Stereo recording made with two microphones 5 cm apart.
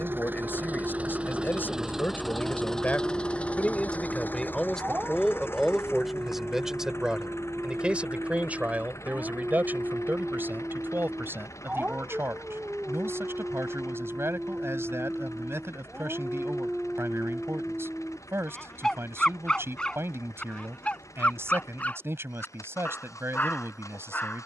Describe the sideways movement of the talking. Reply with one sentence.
You can hear the talking move from left to right.